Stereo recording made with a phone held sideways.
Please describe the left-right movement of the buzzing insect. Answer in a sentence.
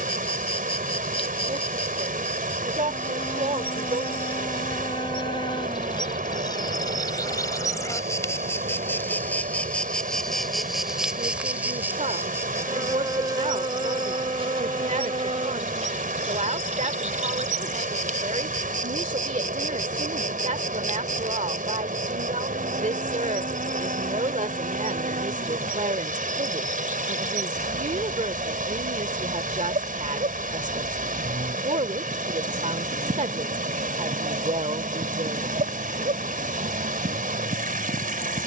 You can hear the buzzing insect move from left to right.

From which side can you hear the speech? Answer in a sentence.
In this clip you hear the speech on the right.